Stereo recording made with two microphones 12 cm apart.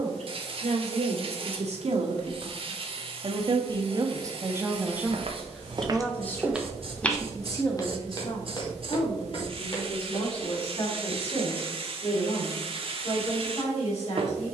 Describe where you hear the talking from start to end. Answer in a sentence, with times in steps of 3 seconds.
In this clip you hear the talking on the right from 0 s and on the left from 6 s.